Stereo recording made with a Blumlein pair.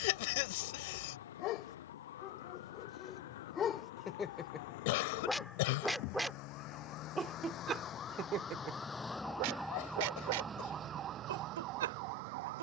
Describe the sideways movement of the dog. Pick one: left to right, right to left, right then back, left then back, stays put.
left to right.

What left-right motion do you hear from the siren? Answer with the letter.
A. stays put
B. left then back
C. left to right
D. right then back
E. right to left
C.